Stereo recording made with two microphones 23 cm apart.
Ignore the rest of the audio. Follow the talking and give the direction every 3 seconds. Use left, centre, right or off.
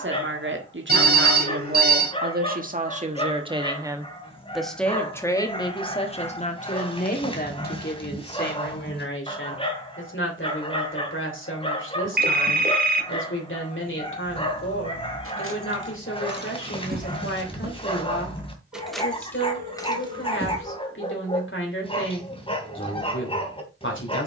right, centre, left, left, left, left, left, left.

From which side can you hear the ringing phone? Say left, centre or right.
right.